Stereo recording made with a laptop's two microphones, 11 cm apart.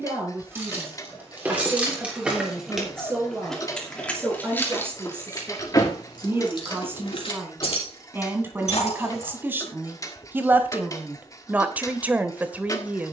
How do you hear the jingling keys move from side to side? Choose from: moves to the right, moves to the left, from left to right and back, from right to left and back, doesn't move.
moves to the left.